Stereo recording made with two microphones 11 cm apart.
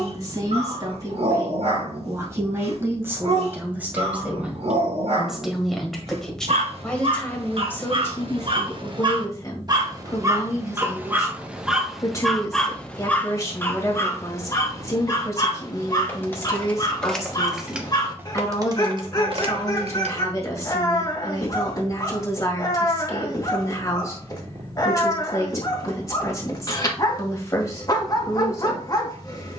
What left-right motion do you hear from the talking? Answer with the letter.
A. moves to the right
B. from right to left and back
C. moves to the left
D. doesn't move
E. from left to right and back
C.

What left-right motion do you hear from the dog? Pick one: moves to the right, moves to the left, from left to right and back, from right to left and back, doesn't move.
moves to the left.